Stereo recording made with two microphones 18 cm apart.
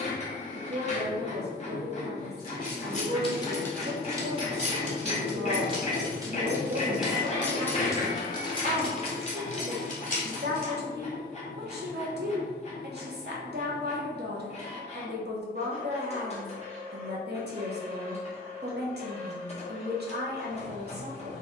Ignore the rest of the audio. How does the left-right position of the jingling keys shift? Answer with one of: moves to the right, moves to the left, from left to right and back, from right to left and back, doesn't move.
from left to right and back.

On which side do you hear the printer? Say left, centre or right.
left.